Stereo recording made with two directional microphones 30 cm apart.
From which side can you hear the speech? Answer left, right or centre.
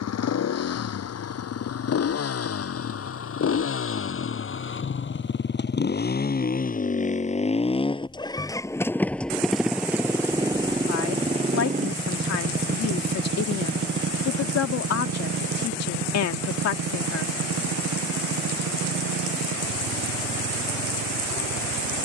left.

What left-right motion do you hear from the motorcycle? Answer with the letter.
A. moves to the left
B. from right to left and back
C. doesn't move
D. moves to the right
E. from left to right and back
D.